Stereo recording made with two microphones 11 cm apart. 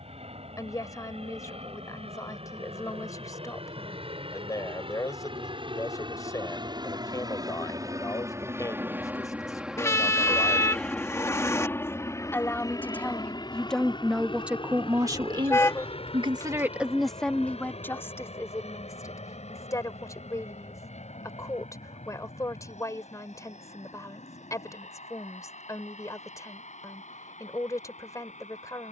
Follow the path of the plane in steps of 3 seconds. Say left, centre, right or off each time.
right, right, right, centre, left, left, left, left, left, left.